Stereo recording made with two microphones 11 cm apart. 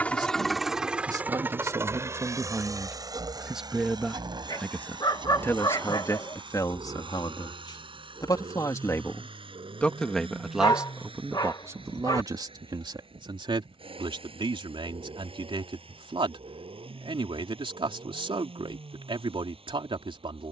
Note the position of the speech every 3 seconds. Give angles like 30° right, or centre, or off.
30° right, 10° left, 40° left, centre, 50° right, 50° right, 50° right.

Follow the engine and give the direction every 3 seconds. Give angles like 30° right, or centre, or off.
20° right, 40° right, 50° right, 50° right, 60° right, 60° right, 60° right.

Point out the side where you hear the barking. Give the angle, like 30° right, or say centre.
40° left.